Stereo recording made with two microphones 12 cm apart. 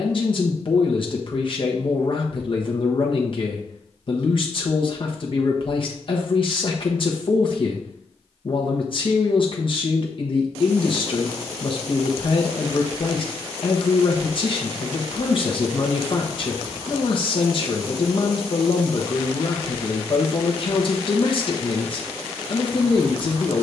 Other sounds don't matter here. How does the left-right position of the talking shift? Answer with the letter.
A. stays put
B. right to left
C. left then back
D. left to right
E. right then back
A.